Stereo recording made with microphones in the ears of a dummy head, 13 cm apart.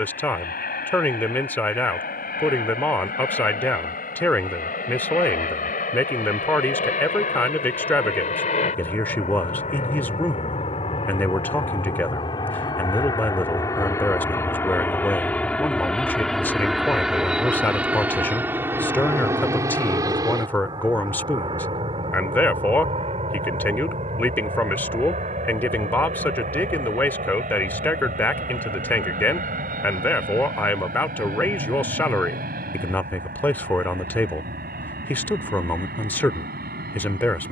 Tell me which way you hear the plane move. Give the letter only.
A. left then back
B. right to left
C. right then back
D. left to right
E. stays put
D.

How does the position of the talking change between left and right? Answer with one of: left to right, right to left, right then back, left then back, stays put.
stays put.